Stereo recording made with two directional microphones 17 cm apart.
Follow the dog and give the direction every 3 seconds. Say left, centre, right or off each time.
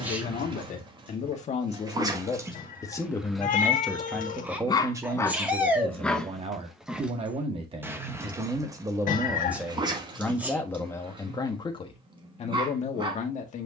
right, centre, centre, right, right.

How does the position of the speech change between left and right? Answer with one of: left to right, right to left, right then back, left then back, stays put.
right then back.